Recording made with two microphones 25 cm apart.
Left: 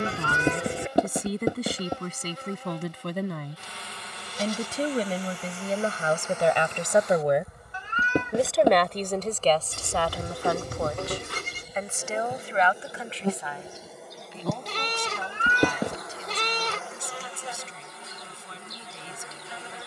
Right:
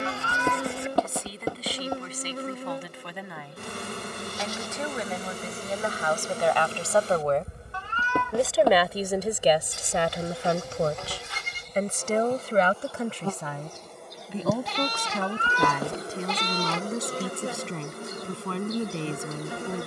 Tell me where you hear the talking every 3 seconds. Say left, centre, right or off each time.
left, left, centre, right, right, right, right.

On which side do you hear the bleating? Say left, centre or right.
left.